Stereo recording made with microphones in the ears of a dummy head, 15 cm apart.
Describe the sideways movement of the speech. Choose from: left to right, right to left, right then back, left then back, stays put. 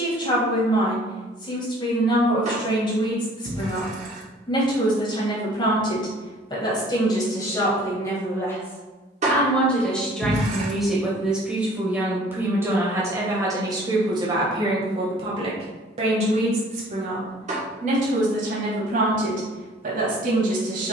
left to right.